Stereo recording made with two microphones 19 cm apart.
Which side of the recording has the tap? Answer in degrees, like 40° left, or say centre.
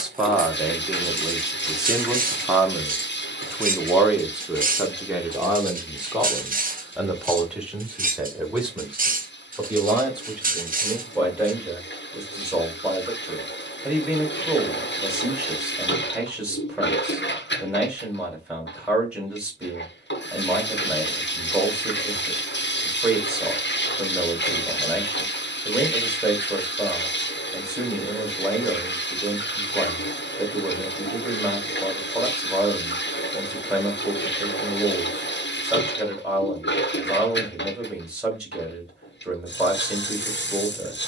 70° left.